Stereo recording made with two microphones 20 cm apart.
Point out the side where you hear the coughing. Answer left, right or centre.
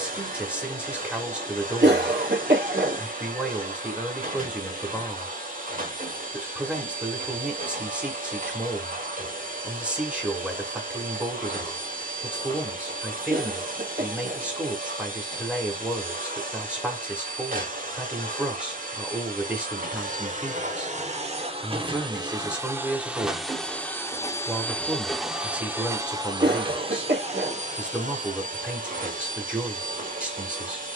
right.